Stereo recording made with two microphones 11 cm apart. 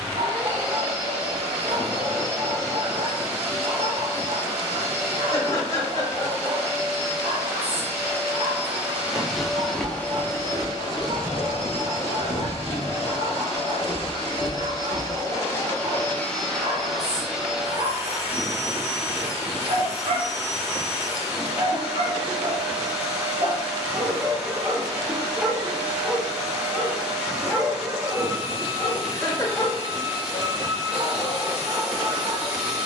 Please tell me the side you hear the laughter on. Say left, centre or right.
left.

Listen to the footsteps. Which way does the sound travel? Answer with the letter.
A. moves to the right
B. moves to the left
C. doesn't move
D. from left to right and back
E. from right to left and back
D.